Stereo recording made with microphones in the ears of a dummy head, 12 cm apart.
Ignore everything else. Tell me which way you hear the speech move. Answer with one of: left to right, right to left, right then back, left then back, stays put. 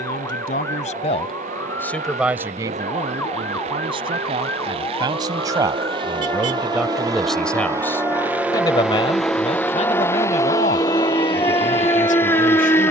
right then back.